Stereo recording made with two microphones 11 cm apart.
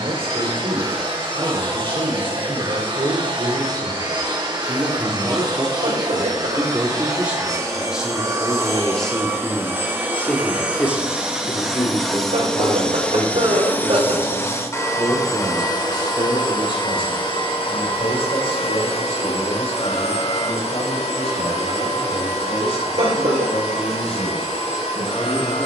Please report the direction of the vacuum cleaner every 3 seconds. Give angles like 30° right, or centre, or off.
50° right, 40° right, 30° right, 10° right, 10° left, 40° left, 60° left, 70° left, 80° left.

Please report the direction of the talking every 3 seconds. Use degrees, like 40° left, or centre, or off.
50° right, 30° right, 10° right, 20° left, 30° left, 50° left, 60° left, 60° left, 70° left.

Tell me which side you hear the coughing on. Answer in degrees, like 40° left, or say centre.
70° right.